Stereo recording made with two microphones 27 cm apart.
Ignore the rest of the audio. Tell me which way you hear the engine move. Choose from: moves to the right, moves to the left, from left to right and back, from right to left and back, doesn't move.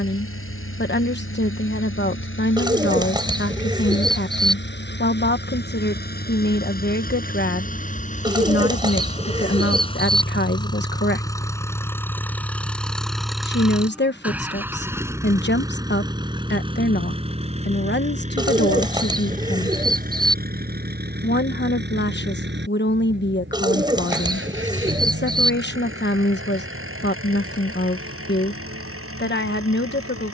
moves to the right.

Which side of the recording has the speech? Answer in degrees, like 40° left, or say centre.
40° left.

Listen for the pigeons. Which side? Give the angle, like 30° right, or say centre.
20° right.